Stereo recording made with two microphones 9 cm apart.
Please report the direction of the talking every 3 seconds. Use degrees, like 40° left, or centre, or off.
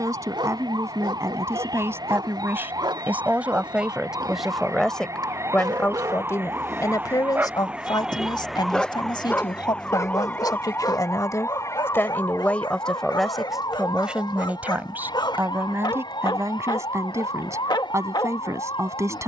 30° right, centre, 50° left, 50° left, centre, 30° right, 40° right.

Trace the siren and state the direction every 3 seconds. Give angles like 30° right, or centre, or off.
60° right, 40° right, 20° right, 20° left, 50° left, 60° left, 70° left.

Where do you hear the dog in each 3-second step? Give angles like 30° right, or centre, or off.
70° right, 60° right, 20° right, 40° left, 60° left, 60° left, 60° left.